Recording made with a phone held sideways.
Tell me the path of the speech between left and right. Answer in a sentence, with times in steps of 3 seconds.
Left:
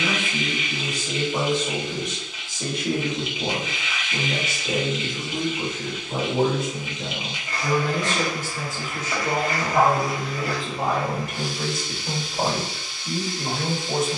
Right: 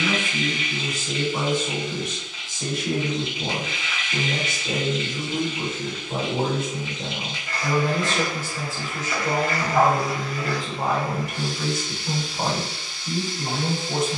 You can hear the speech on the left from 0 s, in the centre from 3 s, on the right from 6 s, in the centre from 9 s and on the left from 12 s.